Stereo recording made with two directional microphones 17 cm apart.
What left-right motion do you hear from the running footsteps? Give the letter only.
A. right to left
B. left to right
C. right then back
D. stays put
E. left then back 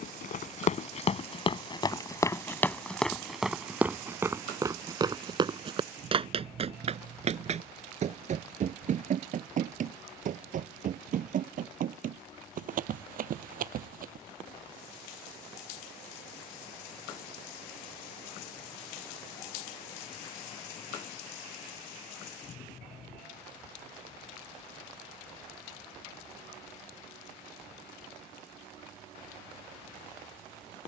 B.